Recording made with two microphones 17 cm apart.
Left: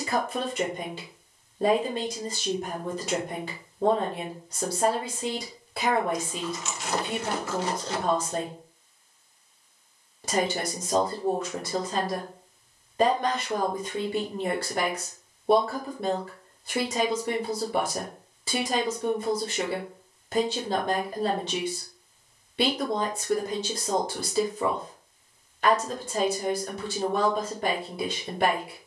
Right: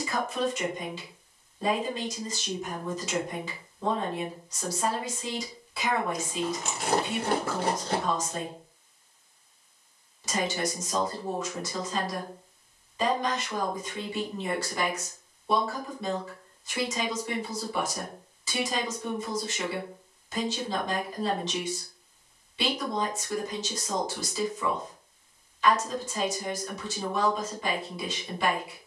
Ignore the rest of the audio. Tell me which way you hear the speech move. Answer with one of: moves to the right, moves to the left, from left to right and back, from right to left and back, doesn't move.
doesn't move.